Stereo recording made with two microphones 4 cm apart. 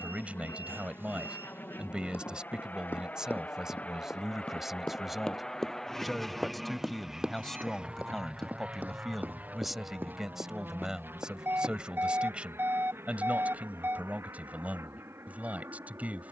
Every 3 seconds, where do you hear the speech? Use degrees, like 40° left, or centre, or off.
20° right, 10° right, 10° left, 10° right, 30° right, 30° right.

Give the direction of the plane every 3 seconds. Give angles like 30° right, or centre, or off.
50° left, 30° left, 10° right, 40° right, 60° right, 70° right.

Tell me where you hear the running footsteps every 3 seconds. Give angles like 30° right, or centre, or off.
50° left, 30° left, 20° right, 50° right, off, off.